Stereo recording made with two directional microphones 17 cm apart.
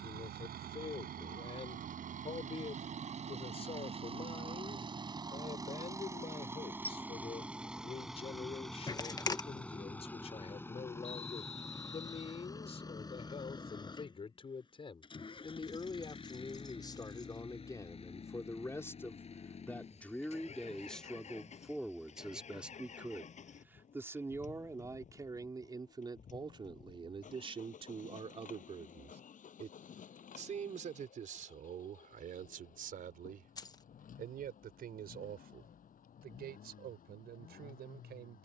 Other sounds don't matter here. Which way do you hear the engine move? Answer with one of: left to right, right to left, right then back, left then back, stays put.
right to left.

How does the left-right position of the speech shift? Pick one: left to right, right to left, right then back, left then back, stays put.
left to right.